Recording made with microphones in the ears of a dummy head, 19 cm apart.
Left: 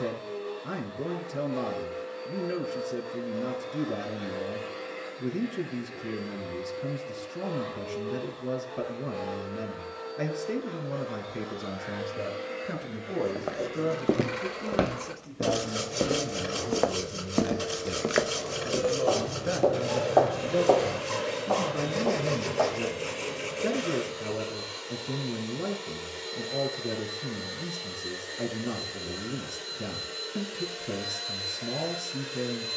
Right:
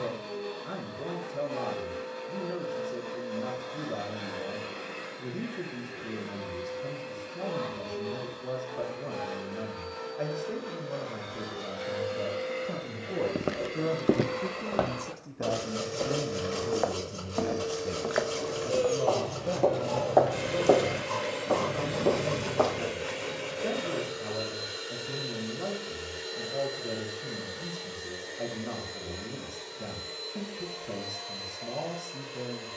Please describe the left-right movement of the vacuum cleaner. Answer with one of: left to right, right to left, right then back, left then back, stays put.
right to left.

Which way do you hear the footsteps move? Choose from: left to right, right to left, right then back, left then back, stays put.
left then back.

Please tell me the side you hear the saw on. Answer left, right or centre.
left.